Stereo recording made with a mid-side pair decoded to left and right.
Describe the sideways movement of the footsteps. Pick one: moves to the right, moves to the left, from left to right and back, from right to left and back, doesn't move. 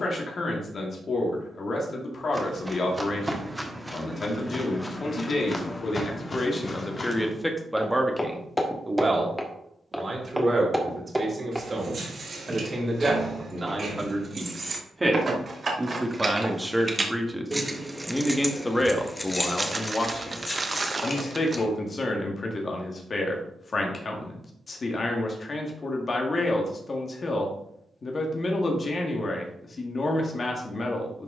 from right to left and back.